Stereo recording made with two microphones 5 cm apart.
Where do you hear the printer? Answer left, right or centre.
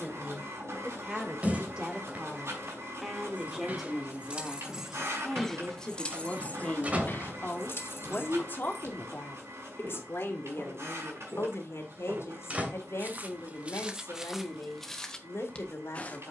right.